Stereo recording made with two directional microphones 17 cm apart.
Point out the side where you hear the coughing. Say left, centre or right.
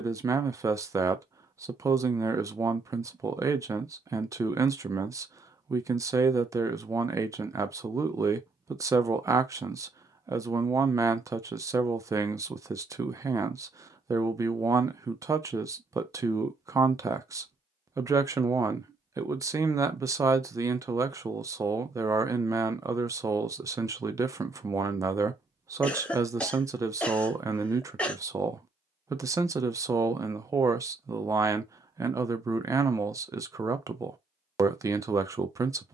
centre.